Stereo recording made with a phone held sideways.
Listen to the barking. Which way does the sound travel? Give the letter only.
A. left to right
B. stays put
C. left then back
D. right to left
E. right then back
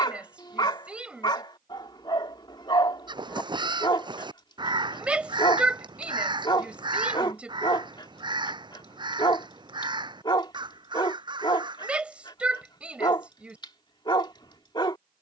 B.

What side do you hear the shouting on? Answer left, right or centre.
centre.